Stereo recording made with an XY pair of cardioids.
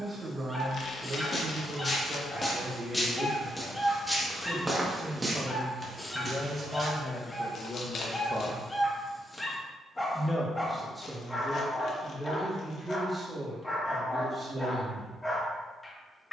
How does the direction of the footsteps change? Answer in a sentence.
You can hear the footsteps move from left to right.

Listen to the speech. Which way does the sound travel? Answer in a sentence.
In this clip you hear the speech move from right to left and back again.